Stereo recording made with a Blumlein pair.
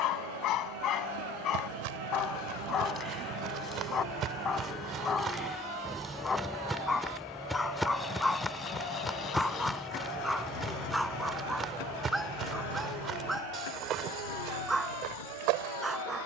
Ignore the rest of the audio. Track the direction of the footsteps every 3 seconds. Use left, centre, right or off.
right, right, centre, centre, right, right.